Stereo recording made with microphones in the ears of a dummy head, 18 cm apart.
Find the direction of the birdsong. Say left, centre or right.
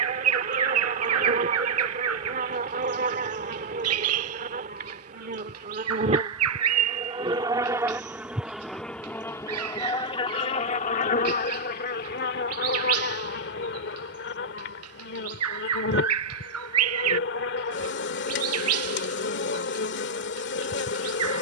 right.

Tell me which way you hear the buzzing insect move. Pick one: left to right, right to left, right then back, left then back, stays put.
right to left.